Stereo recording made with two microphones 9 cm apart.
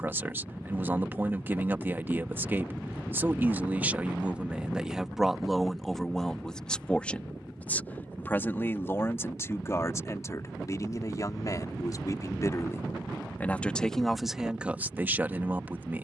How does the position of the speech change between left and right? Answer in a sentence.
You can hear the speech move from right to left and back again.